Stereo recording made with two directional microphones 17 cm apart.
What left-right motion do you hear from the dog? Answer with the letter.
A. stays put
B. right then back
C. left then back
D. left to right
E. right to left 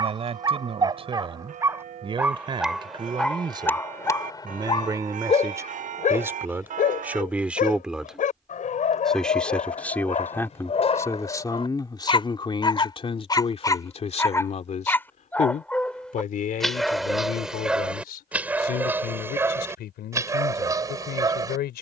C.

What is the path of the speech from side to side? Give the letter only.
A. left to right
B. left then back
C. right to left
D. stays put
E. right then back
C.